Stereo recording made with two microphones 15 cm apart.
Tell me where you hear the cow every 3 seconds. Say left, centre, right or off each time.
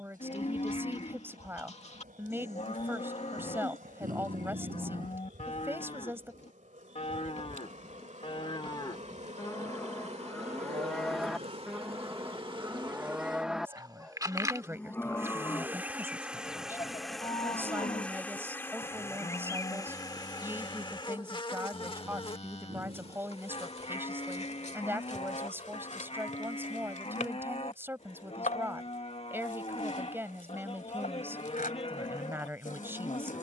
left, left, left, centre, centre, left, left, left, left, left, left.